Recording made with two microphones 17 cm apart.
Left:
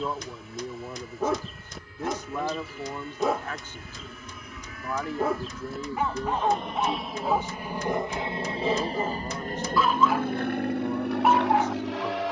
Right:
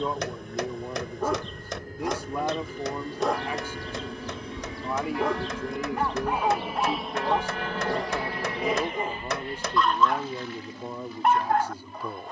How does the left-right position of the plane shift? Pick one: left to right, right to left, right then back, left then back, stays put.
right to left.